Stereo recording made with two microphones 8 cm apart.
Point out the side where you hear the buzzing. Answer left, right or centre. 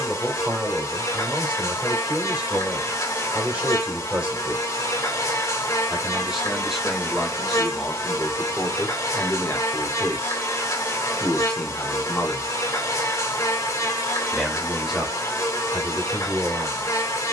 left.